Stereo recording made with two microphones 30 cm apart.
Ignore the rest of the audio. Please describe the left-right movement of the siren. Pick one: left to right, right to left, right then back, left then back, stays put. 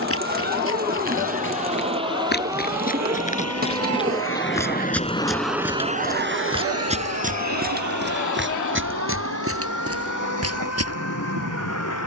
right to left.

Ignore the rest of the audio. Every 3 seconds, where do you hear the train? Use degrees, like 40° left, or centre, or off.
70° left, 30° left, 60° right, 80° right.